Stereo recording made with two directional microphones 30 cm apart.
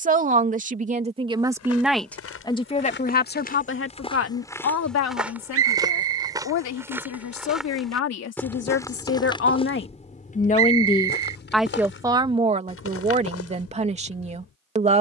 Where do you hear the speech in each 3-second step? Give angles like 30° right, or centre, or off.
10° right, 50° left, 60° left, 30° left, 20° right.